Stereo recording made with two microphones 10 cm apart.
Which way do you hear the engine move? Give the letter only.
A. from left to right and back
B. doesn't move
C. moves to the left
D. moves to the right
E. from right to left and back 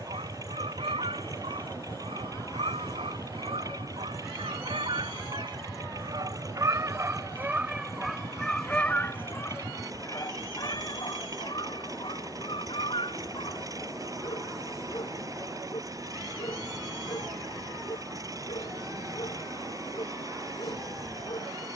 B.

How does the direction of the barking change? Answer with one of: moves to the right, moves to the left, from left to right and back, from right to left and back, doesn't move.
moves to the left.